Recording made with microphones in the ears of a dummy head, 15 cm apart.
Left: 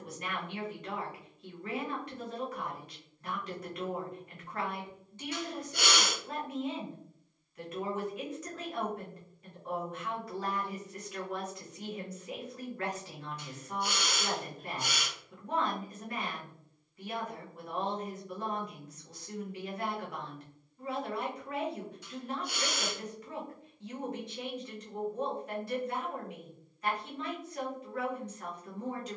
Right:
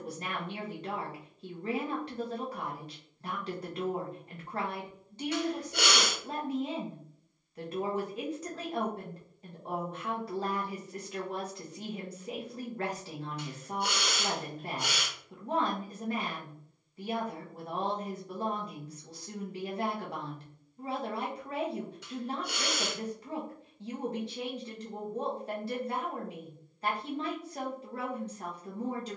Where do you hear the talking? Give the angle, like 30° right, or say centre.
30° right.